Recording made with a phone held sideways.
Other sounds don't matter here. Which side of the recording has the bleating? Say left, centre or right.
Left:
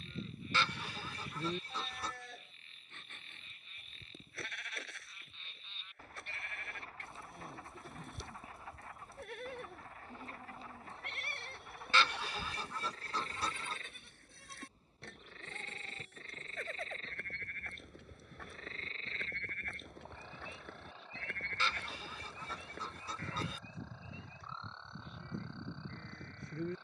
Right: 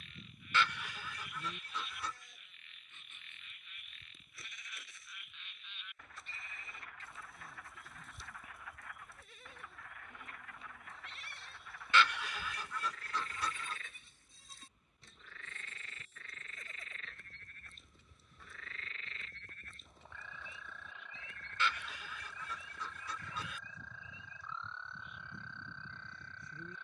left.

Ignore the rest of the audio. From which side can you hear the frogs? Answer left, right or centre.
left.